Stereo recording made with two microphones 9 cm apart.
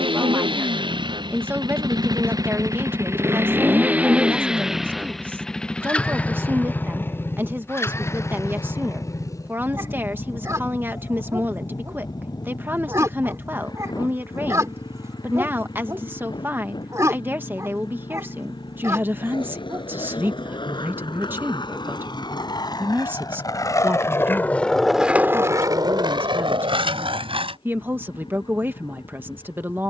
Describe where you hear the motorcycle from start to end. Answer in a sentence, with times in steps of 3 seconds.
In this clip you hear the motorcycle on the right from 0 s, in the centre from 3 s and on the left from 6 s.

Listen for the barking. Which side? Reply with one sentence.
You can hear the barking on the right.